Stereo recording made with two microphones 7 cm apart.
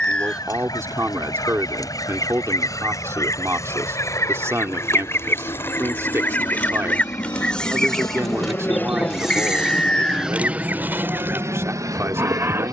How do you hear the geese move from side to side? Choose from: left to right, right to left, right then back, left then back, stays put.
left to right.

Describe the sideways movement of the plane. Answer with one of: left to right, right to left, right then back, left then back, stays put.
left to right.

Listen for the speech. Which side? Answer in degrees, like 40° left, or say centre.
40° right.